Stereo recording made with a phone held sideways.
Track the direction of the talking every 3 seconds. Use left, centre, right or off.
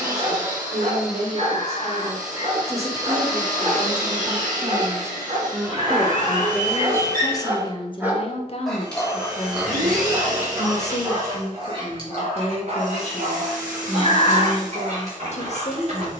right, right, left, left, left, left.